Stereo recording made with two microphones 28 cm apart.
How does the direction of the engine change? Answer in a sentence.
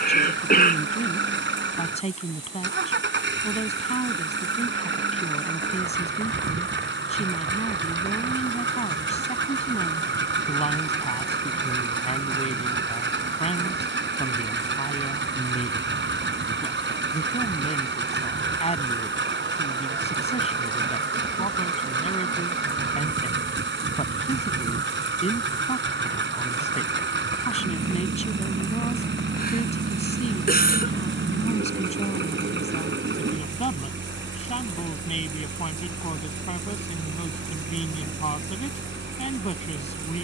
You can hear the engine stay put.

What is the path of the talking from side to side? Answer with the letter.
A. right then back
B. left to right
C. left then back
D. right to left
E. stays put
E.